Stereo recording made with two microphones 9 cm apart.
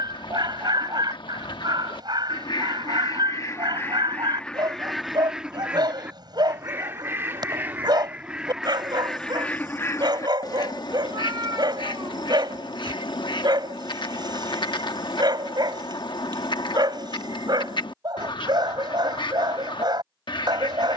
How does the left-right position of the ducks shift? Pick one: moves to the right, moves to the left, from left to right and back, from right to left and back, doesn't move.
from left to right and back.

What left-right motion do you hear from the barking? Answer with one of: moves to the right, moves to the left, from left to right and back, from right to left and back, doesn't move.
doesn't move.